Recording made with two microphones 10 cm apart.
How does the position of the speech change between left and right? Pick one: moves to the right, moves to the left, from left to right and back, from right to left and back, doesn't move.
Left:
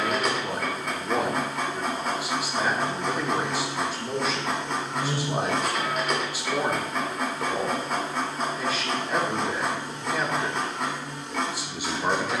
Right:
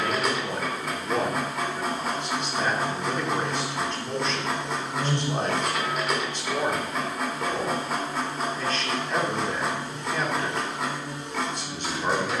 doesn't move.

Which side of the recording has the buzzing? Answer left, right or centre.
right.